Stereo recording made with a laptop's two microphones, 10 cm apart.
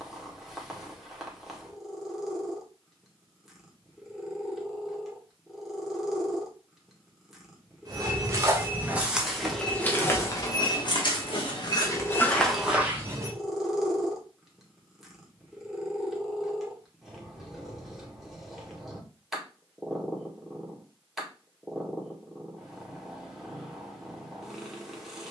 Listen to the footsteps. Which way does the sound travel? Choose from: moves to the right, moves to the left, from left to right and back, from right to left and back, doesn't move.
from right to left and back.